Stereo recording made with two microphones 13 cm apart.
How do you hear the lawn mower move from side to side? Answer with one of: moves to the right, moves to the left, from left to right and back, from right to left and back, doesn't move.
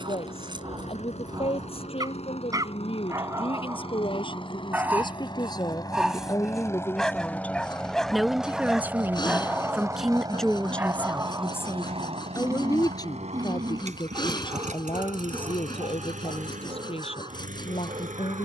moves to the right.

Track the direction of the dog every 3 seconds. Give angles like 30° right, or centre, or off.
30° right, 20° right, centre, 10° right, 30° right, 40° right.